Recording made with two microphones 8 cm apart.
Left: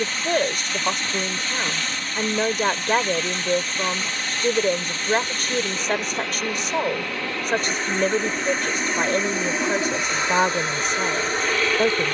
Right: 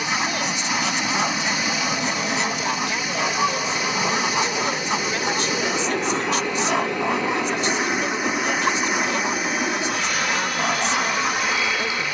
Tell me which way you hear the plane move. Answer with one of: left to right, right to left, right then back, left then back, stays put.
right to left.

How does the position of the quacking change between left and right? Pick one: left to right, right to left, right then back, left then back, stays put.
stays put.